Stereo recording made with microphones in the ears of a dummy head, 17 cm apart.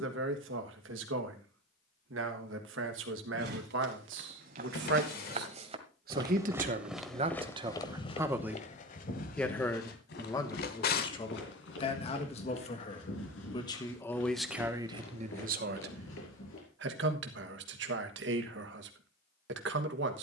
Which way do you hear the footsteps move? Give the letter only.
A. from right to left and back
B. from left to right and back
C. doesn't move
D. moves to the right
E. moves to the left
E.